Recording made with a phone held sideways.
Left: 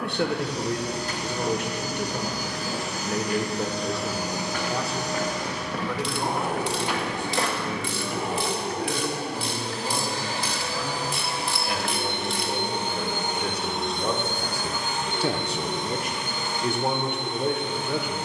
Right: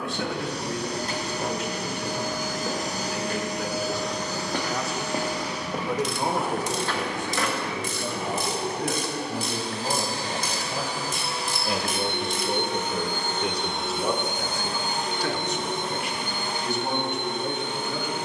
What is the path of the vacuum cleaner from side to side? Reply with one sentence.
You can hear the vacuum cleaner move from right to left and back again.